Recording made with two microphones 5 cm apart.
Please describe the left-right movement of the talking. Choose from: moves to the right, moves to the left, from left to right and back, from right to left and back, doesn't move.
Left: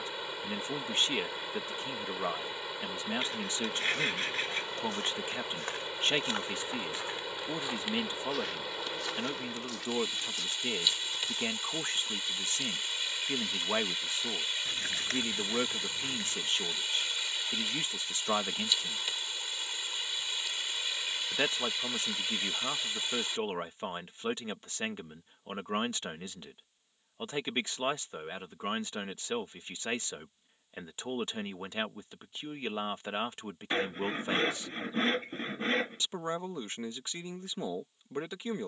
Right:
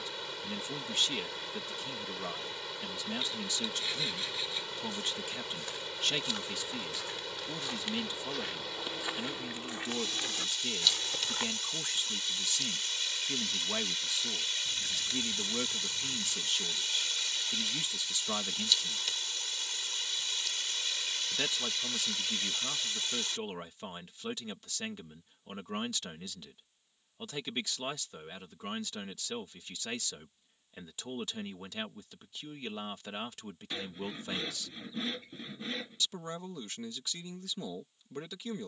doesn't move.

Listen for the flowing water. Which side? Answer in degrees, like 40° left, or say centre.
20° left.